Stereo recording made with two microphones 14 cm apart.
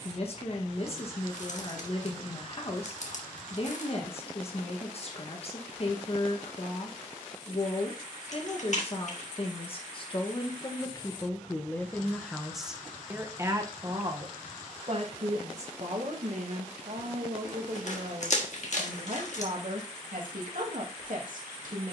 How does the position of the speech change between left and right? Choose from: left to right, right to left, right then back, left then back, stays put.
left to right.